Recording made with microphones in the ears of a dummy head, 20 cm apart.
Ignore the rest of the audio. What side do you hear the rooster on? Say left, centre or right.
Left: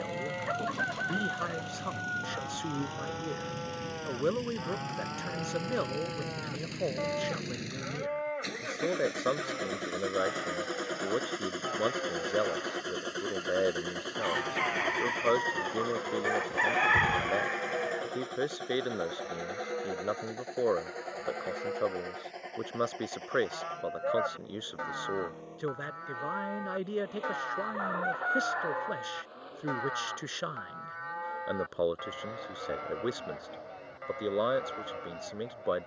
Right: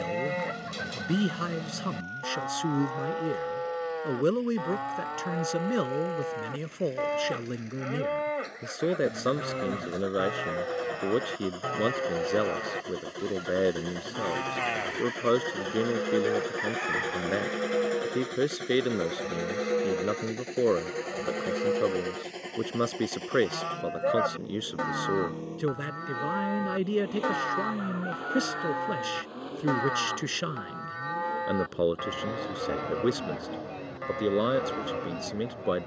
left.